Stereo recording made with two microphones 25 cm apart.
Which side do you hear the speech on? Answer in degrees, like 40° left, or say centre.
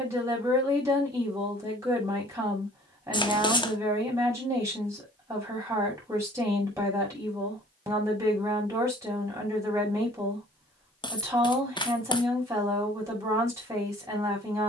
10° right.